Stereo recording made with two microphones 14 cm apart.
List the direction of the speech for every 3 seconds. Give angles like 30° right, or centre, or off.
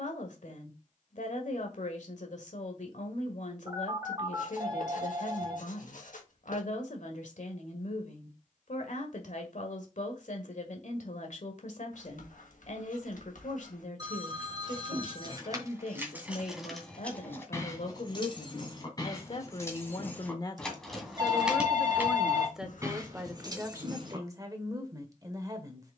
60° left, 60° left, 60° left, 60° left, 60° left, 60° left, 40° left, centre, 20° right.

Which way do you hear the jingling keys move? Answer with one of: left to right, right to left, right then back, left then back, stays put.
left then back.